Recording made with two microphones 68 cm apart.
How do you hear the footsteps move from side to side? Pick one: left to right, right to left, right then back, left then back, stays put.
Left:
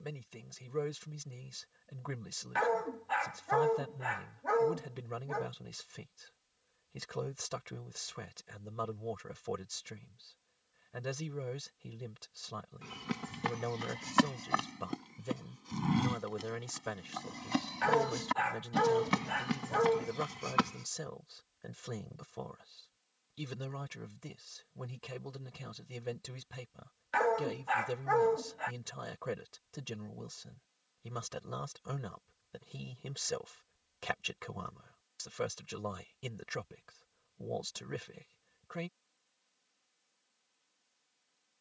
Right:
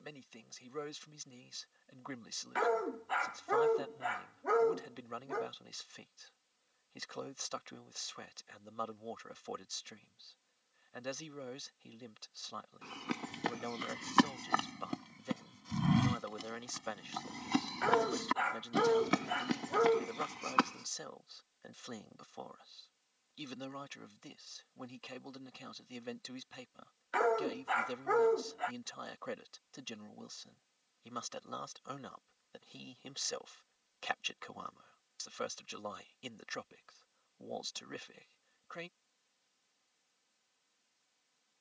right then back.